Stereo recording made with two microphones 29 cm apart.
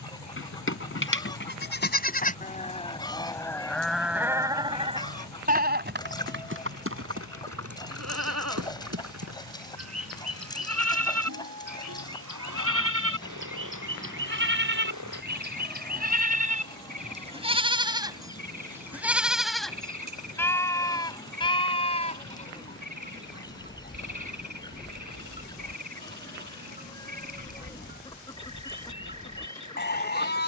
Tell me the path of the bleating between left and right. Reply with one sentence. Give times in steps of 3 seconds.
You can hear the bleating on the left from 0 s, in the centre from 3 s, on the right from 6 s, in the centre from 18 s and on the left from 21 s.